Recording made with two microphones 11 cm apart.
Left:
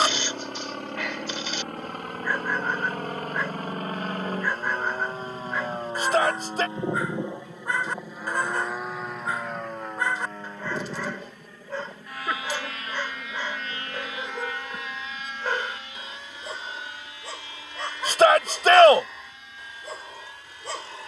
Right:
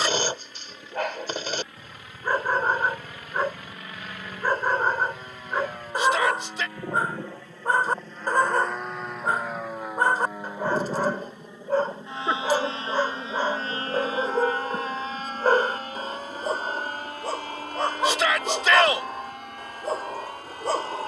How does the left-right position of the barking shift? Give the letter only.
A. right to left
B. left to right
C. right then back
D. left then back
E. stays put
E.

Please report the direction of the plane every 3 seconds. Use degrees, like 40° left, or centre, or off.
60° left, 40° left, 20° left, 10° right, 30° right, 40° right, 50° right.